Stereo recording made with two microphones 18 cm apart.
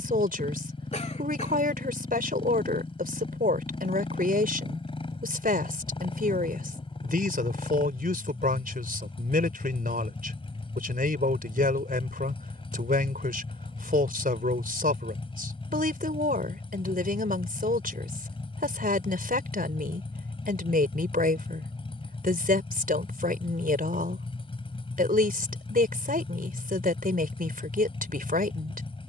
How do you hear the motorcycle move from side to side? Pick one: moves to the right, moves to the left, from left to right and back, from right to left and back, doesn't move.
doesn't move.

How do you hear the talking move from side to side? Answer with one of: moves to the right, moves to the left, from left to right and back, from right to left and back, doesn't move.
doesn't move.